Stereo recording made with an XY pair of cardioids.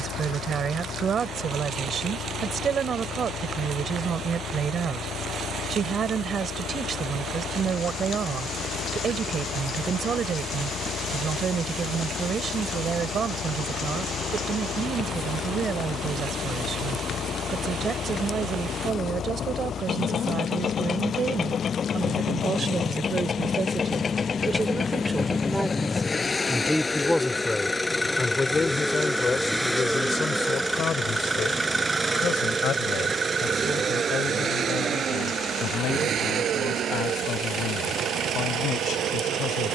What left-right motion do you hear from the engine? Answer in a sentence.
In this clip you hear the engine travel towards the right.